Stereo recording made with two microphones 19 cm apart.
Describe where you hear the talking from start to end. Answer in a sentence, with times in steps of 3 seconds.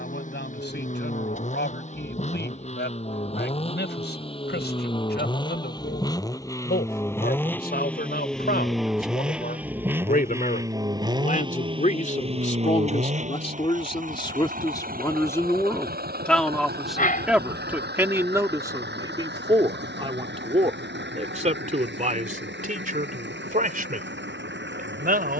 You can hear the talking on the left from 0 s, in the centre from 15 s and on the right from 18 s.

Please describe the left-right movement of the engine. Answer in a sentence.
In this clip you hear the engine move from left to right.